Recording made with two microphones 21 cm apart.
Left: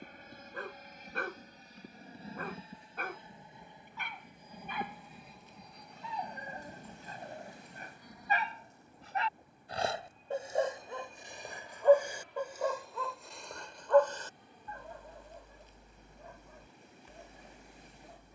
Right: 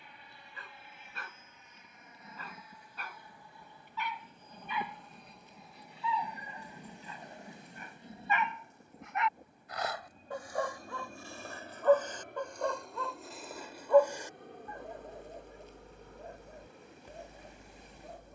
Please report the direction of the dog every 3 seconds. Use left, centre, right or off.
left, left, left, left, centre, right.